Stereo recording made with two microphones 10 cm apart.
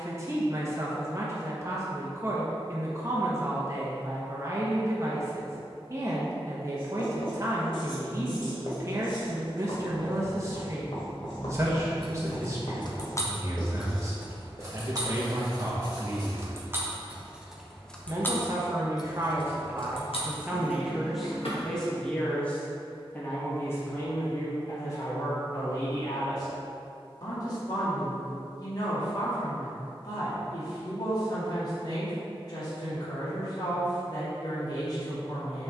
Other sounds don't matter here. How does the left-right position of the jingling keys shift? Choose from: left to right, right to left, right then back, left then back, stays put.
right then back.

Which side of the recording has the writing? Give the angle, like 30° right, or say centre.
50° left.